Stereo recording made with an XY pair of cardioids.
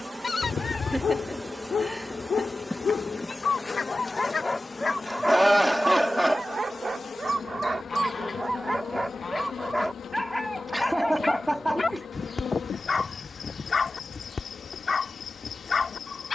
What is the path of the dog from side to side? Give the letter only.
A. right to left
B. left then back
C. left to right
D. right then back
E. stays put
D.